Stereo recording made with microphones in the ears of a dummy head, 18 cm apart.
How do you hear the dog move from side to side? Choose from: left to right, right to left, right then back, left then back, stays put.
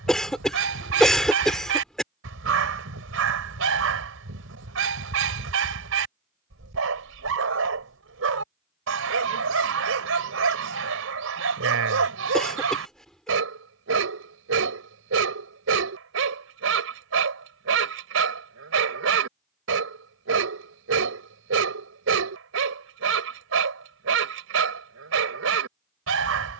stays put.